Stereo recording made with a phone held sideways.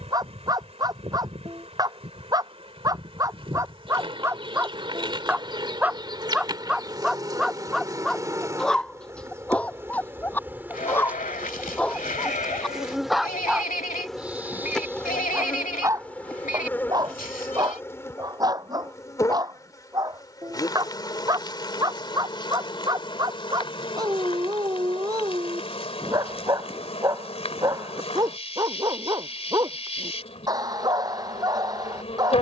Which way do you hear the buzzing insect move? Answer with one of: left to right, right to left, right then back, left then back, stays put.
right to left.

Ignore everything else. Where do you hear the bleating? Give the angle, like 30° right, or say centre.
60° left.